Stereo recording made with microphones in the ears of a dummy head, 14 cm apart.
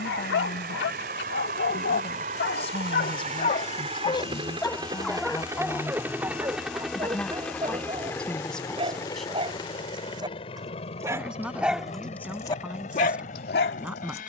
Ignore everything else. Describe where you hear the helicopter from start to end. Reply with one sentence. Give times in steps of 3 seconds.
In this clip you hear the helicopter on the right from 0 s, in the centre from 6 s and on the left from 9 s.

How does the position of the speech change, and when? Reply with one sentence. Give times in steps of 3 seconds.
In this clip you hear the speech on the left from 0 s and in the centre from 6 s.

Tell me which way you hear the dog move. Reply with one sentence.
You can hear the dog move from left to right and back again.